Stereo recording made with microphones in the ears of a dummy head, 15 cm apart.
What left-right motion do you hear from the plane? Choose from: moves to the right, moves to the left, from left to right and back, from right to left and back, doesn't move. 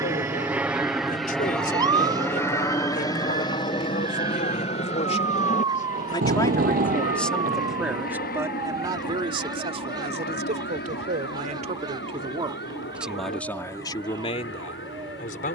moves to the left.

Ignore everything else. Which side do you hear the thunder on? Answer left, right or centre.
right.